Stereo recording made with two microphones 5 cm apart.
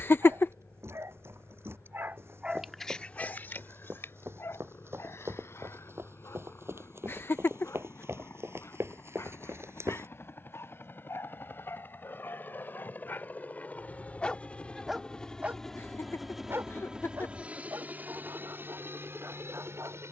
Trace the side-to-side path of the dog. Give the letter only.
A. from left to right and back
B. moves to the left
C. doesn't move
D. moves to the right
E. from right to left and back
E.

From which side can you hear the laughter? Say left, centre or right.
left.